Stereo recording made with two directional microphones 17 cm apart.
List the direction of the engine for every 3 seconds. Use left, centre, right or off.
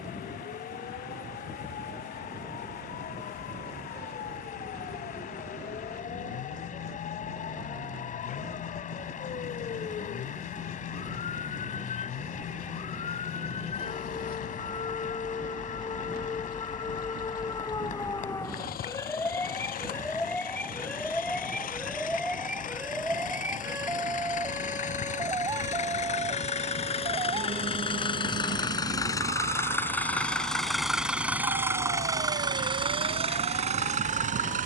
left, left, left, left, left, off, left, left, left, left, centre, right.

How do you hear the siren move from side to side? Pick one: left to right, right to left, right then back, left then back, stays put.
left to right.